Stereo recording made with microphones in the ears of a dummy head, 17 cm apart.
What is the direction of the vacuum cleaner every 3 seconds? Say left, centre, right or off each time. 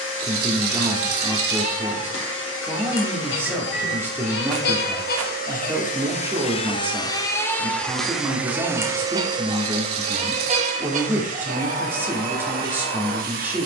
left, left, centre, right, right.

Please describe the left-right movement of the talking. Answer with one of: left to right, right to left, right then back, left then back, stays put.
stays put.